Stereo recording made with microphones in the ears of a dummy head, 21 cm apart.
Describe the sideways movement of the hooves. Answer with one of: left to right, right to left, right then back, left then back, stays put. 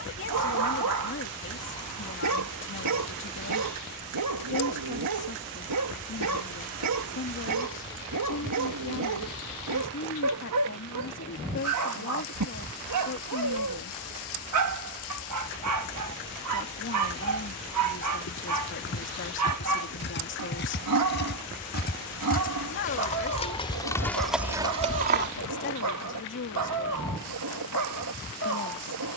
left to right.